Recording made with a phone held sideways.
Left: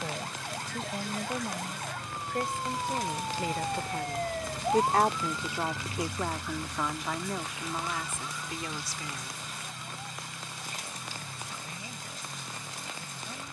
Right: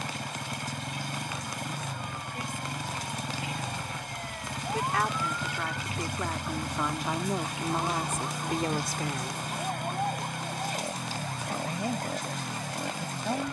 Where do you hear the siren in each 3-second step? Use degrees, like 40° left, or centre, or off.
70° left, 40° left, 40° right, 60° right, 70° right.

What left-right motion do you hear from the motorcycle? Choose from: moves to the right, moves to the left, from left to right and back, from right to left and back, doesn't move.
doesn't move.